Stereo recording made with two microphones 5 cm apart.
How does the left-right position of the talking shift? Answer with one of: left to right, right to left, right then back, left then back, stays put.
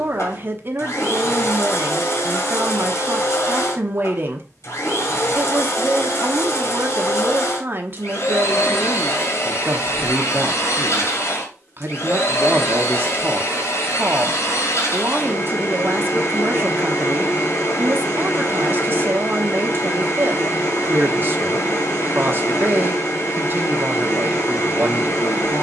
stays put.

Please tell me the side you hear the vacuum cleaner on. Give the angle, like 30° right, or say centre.
70° left.